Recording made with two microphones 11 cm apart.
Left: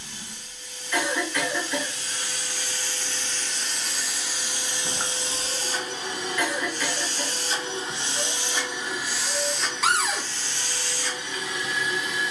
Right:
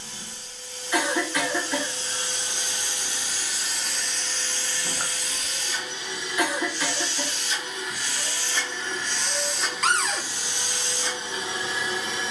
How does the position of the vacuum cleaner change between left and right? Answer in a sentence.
In this clip you hear the vacuum cleaner go left and come back.